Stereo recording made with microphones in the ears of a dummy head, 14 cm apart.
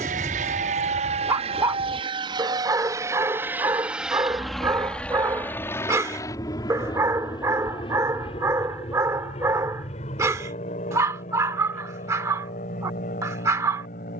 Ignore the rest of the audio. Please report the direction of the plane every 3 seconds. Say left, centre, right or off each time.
right, centre, left, left, left.